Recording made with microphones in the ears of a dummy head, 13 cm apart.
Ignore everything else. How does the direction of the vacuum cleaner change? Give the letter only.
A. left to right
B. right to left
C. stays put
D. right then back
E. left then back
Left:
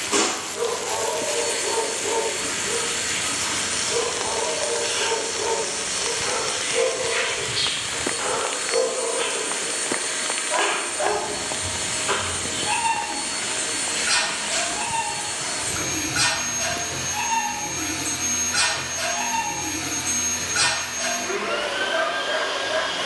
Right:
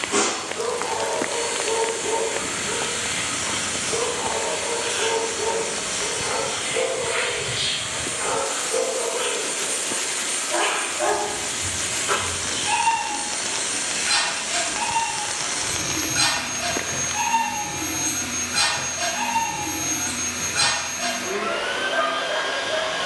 C.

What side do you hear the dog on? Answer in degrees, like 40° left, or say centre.
30° left.